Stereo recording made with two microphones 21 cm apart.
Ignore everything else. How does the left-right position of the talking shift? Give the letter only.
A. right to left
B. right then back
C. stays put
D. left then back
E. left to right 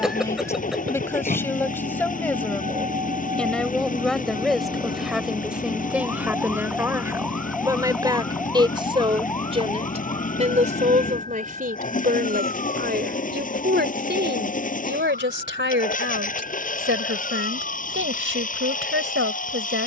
E.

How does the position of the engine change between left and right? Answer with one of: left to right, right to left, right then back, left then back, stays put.
stays put.